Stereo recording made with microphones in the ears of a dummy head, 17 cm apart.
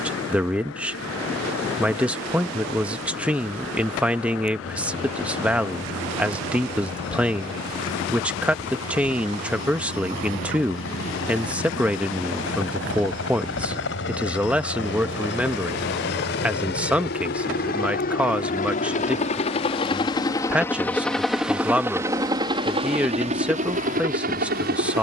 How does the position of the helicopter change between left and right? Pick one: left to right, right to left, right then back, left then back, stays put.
left to right.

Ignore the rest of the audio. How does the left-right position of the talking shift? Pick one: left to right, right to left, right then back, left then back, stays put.
stays put.